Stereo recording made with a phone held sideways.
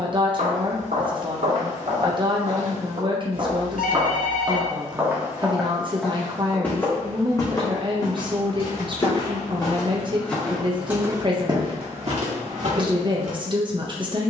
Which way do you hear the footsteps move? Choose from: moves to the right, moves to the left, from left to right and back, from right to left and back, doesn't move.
from right to left and back.